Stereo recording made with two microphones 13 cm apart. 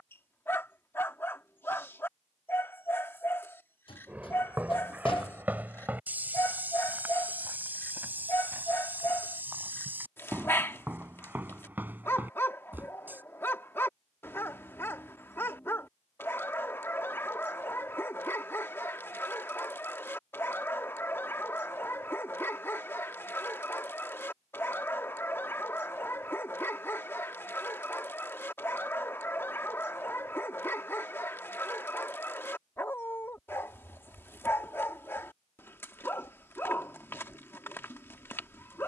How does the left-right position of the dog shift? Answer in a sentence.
You can hear the dog stay in one place.